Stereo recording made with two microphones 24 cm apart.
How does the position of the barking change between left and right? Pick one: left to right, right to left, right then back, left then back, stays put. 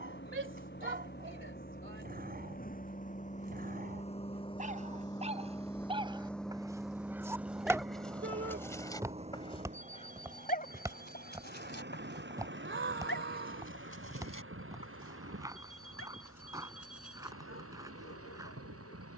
right to left.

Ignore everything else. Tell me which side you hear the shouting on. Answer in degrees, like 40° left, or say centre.
50° right.